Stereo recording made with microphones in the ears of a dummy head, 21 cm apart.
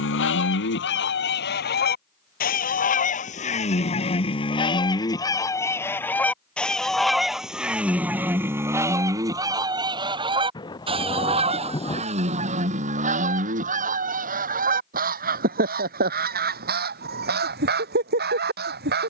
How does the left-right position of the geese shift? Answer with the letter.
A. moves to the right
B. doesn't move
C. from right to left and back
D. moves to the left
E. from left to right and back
A.